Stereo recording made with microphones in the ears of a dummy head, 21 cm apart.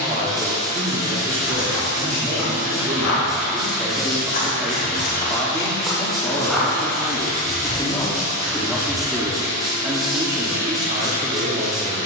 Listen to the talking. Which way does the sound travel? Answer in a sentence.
In this clip you hear the talking move from right to left and back again.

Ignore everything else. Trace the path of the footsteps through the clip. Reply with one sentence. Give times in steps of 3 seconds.
In this clip you hear the footsteps on the left from 0 s, in the centre from 6 s and not at all from 9 s.